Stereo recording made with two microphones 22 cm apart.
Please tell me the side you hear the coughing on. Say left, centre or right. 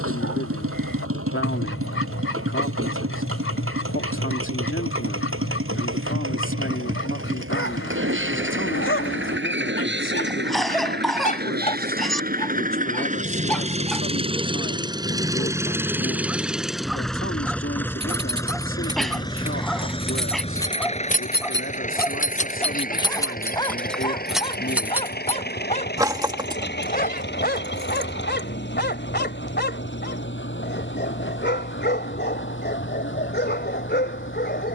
centre.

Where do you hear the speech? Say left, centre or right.
left.